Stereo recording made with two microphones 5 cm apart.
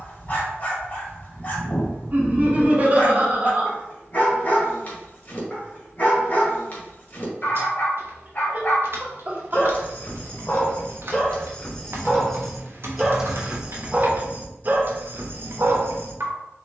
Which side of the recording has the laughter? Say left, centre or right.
right.